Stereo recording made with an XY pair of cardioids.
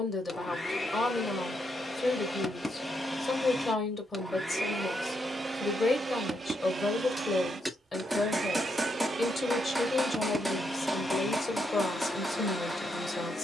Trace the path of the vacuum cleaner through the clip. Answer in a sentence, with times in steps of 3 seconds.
You can hear the vacuum cleaner on the left from 0 s, in the centre from 3 s, on the right from 6 s, in the centre from 9 s and on the left from 12 s.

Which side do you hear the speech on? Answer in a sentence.
You can hear the speech on the left.